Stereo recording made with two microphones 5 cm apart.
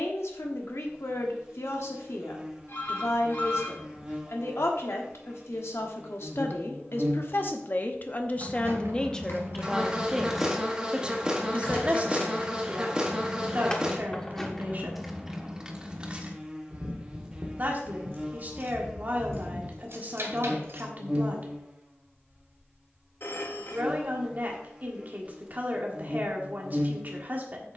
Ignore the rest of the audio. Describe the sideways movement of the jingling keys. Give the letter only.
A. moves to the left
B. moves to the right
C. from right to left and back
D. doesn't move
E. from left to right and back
C.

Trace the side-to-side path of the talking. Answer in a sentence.
In this clip you hear the talking move to the right.